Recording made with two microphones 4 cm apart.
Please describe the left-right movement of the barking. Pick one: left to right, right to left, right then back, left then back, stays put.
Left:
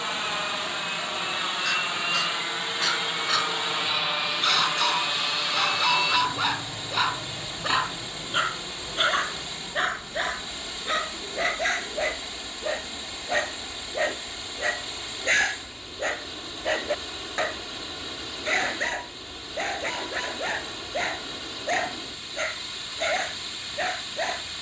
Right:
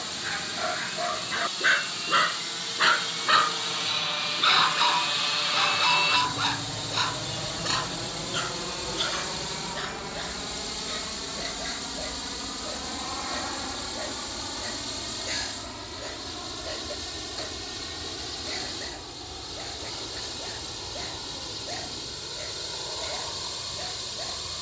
right to left.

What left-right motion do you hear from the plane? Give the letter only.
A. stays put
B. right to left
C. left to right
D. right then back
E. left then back
C.